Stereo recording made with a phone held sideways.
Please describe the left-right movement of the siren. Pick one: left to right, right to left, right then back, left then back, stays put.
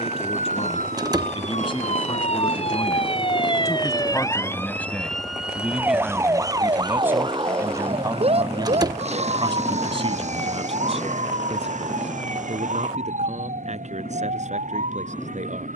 left to right.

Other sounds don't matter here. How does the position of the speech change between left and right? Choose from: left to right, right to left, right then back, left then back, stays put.
left to right.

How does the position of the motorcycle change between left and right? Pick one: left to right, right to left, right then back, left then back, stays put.
right to left.